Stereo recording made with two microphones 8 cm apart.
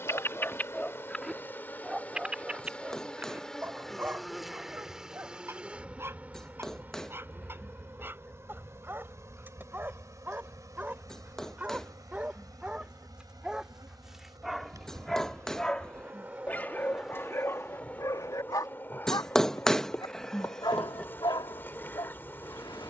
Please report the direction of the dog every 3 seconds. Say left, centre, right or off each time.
centre, right, right, right, centre, left, left, left.